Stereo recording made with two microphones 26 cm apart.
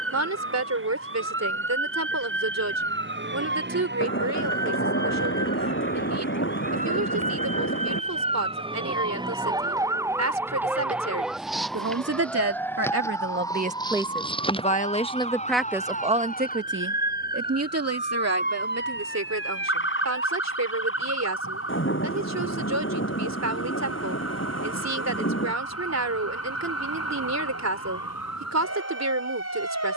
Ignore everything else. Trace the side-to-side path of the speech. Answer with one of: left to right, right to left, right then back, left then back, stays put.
left then back.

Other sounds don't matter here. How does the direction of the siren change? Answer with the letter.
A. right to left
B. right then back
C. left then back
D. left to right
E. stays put
A.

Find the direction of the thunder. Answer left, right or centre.
left.